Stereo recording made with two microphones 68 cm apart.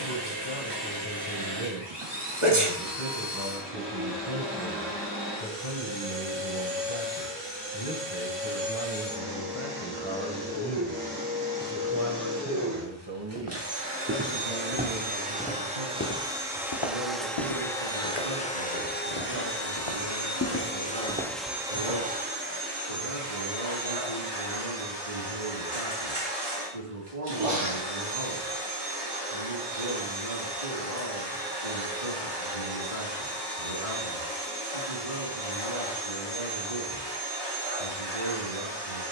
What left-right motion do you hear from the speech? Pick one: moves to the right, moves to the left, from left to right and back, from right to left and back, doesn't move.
moves to the right.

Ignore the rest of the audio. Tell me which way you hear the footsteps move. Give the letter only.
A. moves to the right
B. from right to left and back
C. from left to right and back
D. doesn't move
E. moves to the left
B.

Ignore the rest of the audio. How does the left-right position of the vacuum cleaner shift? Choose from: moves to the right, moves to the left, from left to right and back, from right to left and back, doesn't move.
from right to left and back.